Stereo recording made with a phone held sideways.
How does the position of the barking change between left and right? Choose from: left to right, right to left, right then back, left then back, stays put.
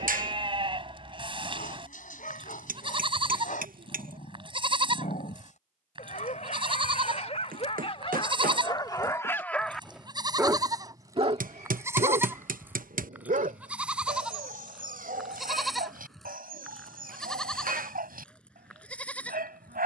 left to right.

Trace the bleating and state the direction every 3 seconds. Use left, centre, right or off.
right, right, right, right, centre, centre, centre.